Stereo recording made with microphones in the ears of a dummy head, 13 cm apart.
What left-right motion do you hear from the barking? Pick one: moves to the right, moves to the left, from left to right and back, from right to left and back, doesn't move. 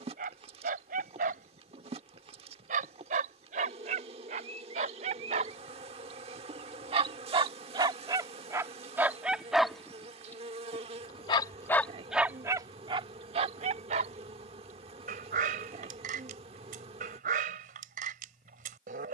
from right to left and back.